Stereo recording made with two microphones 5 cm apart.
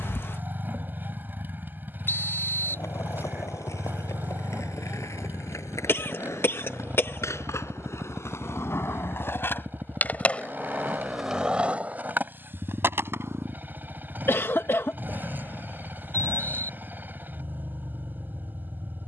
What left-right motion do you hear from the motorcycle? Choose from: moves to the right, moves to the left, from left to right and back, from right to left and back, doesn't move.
doesn't move.